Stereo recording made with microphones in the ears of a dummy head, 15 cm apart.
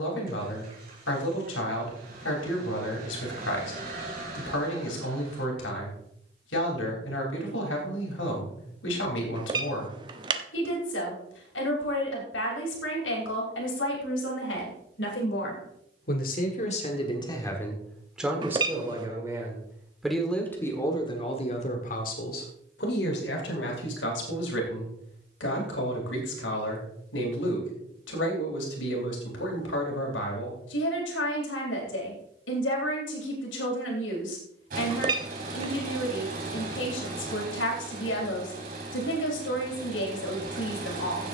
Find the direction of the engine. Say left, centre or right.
right.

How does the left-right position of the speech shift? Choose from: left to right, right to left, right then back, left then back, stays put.
right then back.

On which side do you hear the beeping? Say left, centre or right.
right.